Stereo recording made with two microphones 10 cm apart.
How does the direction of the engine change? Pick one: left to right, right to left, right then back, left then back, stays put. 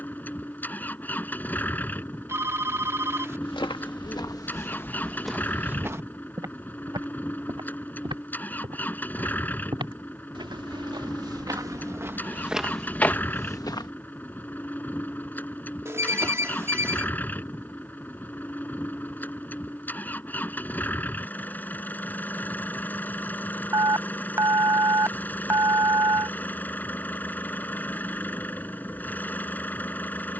stays put.